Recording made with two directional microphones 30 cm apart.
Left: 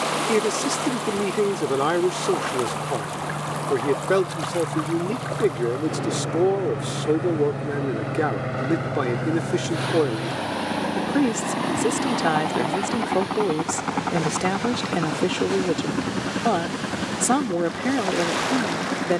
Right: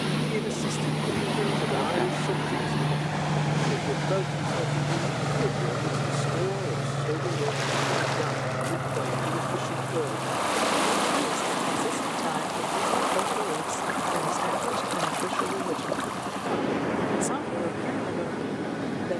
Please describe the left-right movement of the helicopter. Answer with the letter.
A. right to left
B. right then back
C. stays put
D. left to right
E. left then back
A.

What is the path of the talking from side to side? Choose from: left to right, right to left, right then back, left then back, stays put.
stays put.